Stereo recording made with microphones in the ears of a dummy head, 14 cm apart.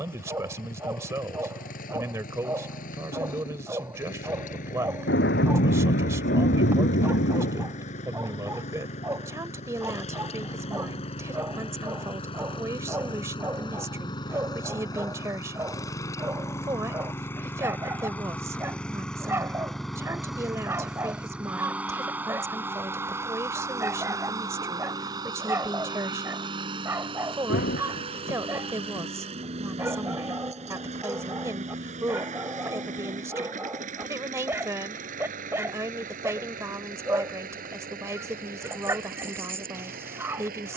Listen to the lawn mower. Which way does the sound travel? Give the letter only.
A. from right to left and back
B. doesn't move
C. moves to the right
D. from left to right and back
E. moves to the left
C.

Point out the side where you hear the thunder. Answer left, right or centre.
left.